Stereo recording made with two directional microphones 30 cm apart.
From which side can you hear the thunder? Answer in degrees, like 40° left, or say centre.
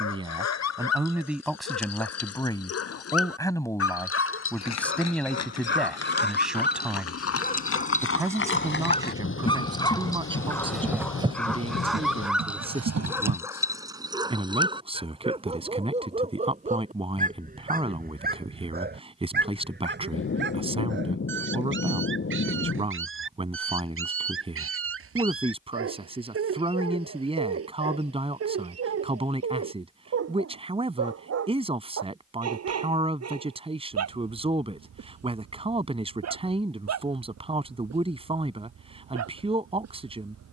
40° left.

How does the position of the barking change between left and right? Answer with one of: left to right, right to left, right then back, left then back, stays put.
left to right.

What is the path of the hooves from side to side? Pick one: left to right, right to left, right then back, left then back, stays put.
left to right.